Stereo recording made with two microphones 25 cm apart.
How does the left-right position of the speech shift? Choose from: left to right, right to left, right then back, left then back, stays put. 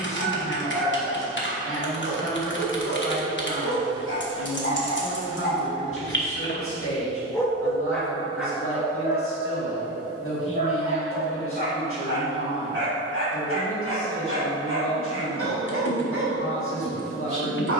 stays put.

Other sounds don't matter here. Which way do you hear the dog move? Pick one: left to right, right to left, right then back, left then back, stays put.
left to right.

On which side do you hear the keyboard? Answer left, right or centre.
left.